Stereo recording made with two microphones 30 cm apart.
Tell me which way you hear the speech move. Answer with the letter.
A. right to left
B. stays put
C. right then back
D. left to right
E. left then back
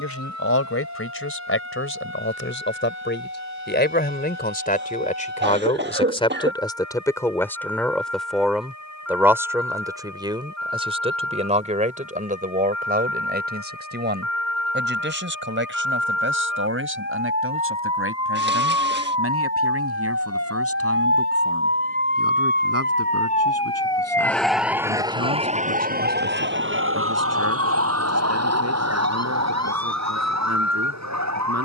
D.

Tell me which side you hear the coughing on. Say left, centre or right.
right.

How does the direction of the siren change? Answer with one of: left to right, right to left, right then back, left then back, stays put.
left to right.